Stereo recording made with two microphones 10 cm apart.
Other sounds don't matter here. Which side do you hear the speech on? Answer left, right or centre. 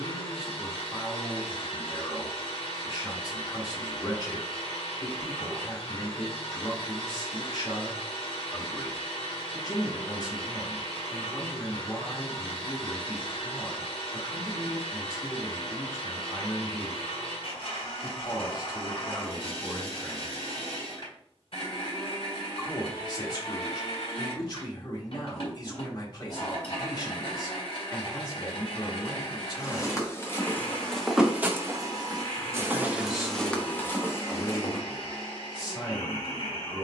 left.